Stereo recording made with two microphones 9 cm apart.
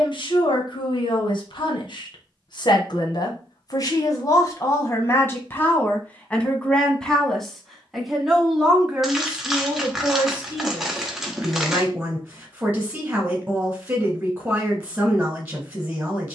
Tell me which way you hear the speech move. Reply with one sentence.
You can hear the speech move from left to right.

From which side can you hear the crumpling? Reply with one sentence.
You can hear the crumpling in the centre.